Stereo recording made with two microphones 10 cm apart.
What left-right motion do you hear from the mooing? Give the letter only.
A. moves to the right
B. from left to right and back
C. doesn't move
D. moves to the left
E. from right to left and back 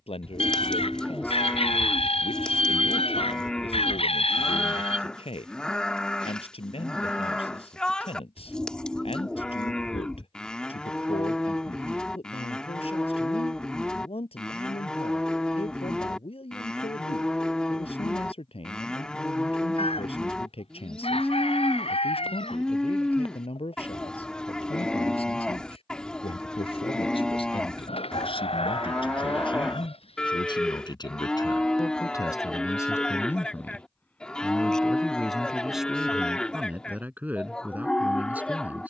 C.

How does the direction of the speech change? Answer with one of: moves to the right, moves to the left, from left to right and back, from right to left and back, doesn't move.
moves to the right.